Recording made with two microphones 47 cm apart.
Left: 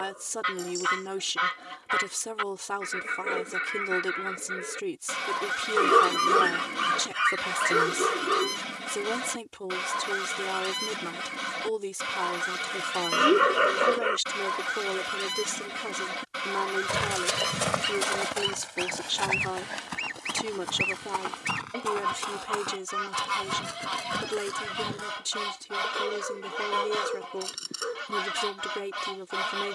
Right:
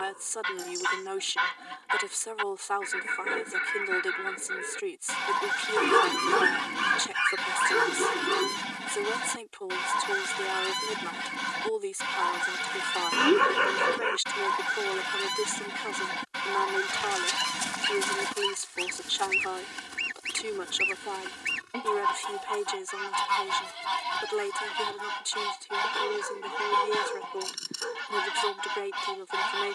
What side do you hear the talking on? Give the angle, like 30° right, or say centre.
60° left.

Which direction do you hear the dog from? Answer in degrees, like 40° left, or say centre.
10° right.